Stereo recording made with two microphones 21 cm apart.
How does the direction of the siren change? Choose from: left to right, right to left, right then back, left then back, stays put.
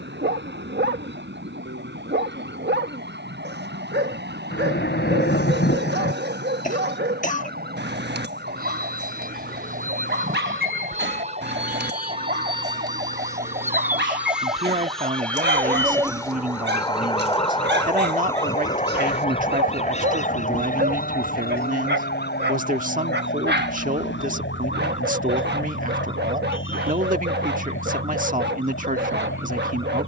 right to left.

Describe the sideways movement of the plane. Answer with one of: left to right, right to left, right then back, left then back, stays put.
right to left.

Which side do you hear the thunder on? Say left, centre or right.
left.